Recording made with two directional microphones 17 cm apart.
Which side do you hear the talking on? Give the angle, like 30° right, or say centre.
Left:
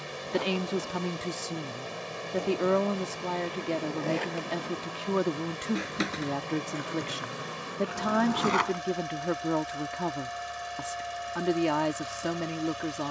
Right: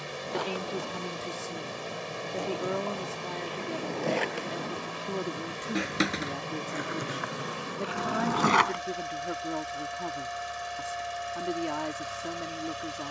40° left.